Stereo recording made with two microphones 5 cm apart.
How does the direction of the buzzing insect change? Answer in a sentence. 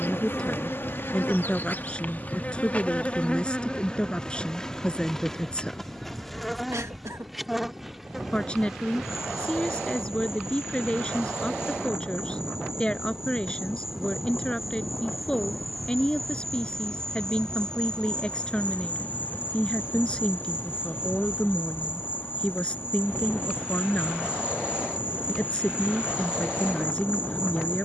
In this clip you hear the buzzing insect move from left to right and back again.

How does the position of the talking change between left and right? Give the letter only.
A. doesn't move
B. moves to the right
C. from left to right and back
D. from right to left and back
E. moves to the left
A.